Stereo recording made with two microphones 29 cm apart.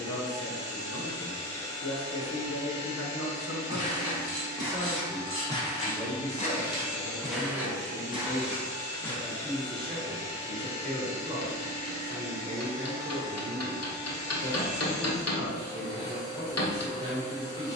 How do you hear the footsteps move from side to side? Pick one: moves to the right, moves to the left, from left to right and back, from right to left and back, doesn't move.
from right to left and back.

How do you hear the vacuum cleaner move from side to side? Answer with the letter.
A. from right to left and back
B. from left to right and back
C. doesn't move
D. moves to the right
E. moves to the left
C.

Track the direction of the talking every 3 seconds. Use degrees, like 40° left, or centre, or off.
60° left, 30° left, 20° right, 30° right, 30° right, 30° right.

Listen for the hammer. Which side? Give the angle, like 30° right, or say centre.
60° left.